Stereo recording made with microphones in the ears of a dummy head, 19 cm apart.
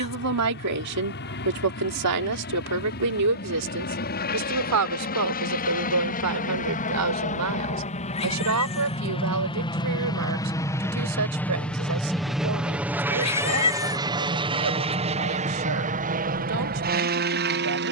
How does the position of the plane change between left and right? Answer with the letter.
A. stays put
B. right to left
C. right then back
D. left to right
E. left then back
D.